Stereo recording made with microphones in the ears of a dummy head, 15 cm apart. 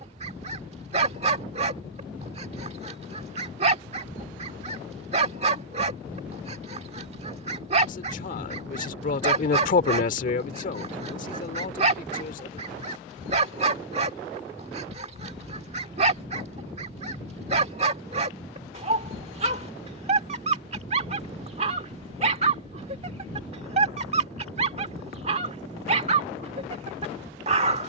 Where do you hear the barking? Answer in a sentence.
You can hear the barking on the right.